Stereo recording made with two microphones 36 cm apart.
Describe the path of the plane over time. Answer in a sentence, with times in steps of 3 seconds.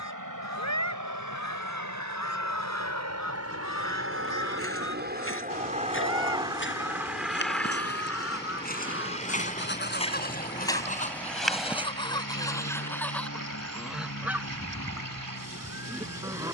In this clip you hear the plane on the right from 0 s, in the centre from 6 s and on the left from 9 s.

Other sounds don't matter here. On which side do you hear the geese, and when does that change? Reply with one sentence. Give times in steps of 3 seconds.
You can hear the geese on the left from 0 s and in the centre from 12 s.